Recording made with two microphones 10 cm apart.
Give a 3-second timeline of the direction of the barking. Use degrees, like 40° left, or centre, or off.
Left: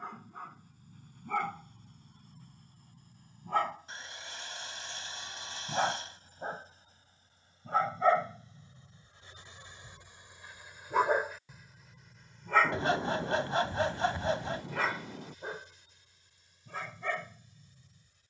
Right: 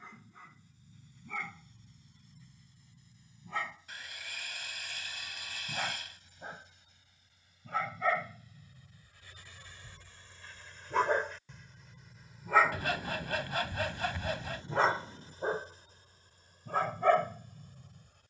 50° left, 40° left, 30° left, 10° left, 10° right, 50° right.